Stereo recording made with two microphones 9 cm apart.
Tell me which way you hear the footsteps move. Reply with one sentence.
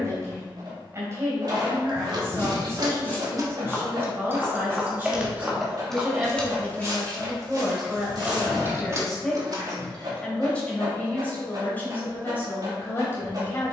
In this clip you hear the footsteps move to the right.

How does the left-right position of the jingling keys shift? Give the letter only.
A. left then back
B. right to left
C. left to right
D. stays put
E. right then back
A.